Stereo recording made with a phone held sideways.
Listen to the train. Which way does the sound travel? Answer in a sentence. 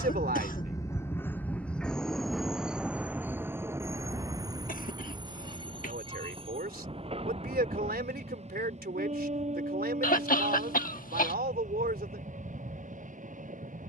In this clip you hear the train travel towards the right.